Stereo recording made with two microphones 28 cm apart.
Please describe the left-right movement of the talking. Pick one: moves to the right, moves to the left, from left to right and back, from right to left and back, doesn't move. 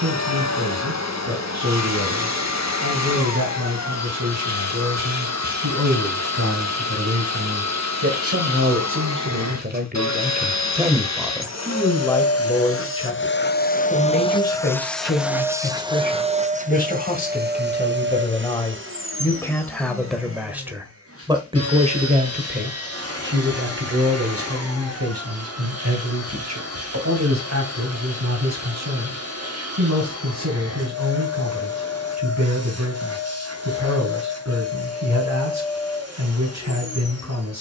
from right to left and back.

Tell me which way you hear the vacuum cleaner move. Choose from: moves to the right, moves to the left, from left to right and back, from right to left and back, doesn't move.
moves to the right.